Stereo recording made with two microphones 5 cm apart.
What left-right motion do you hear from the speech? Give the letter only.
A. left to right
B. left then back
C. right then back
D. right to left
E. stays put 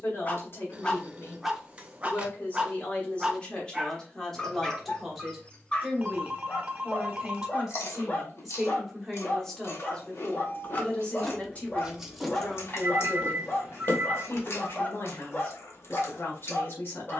C.